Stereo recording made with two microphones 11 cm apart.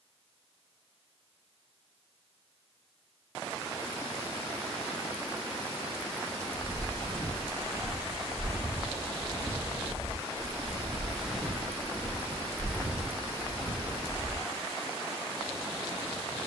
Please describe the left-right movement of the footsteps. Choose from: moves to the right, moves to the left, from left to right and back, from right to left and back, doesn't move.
from left to right and back.